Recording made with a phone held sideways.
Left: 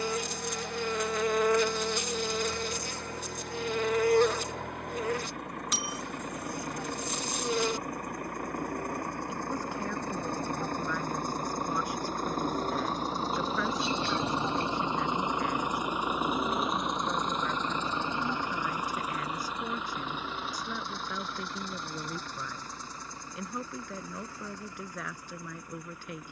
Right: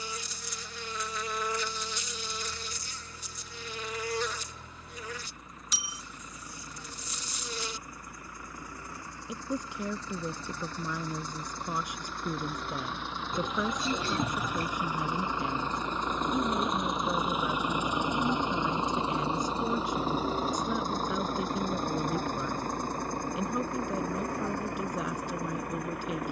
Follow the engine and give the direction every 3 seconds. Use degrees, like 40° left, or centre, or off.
70° left, 70° left, 60° left, 50° left, 40° left, centre, 30° right, 50° right, 60° right.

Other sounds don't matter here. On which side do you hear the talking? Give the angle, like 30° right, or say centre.
20° right.